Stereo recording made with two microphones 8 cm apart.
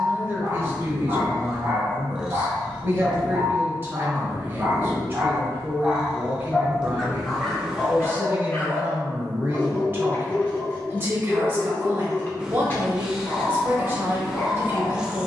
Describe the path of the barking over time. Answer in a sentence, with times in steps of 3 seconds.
In this clip you hear the barking on the right from 0 s, in the centre from 6 s and on the left from 9 s.